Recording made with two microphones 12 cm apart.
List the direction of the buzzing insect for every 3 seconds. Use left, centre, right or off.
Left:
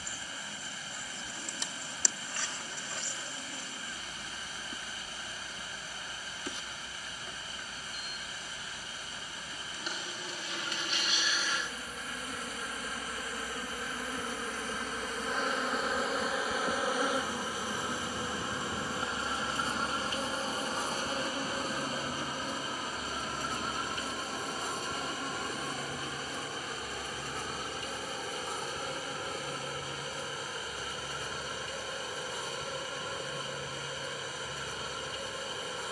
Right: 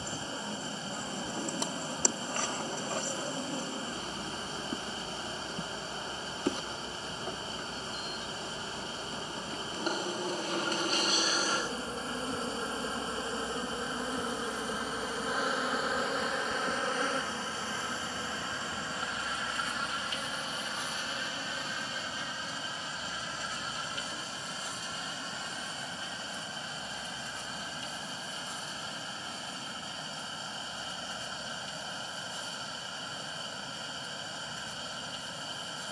right, right, right, right, right, centre, left, left, left, left, left, left.